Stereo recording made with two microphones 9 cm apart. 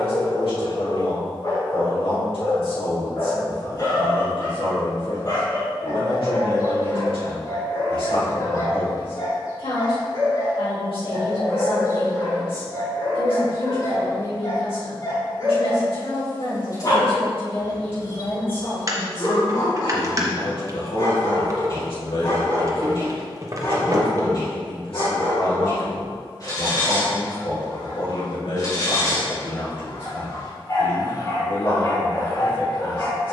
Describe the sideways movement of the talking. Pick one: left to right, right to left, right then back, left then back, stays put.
stays put.